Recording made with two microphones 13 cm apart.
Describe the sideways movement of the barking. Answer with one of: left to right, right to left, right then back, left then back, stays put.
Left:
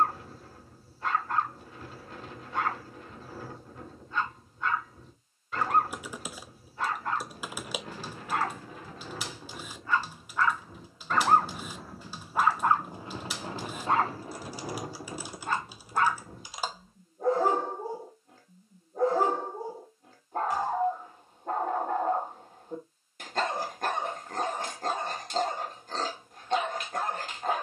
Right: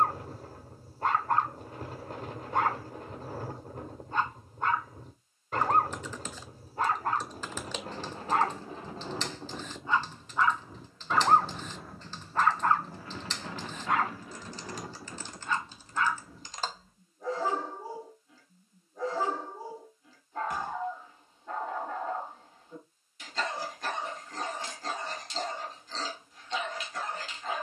right to left.